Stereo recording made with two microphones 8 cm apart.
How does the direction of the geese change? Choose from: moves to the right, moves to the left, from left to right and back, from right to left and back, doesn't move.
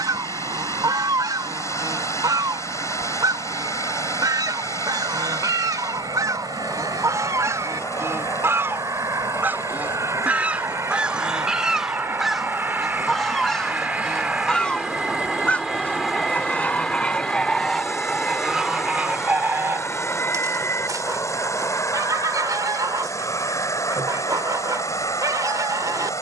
from right to left and back.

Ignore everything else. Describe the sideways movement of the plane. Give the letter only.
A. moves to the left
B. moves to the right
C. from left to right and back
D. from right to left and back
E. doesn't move
A.